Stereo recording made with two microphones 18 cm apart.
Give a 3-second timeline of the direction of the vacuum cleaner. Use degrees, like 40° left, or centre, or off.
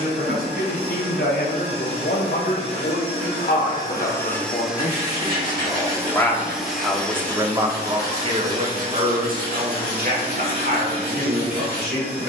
40° left, centre, 10° left, 30° left.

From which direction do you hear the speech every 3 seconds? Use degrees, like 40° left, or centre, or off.
60° left, 40° left, 20° right, 60° right.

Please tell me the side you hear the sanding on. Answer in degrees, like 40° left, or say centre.
60° right.